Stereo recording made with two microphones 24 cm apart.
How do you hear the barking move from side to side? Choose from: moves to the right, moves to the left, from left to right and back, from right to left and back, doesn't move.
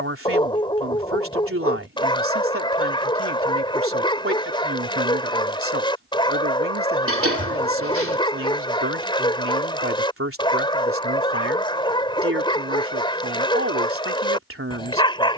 doesn't move.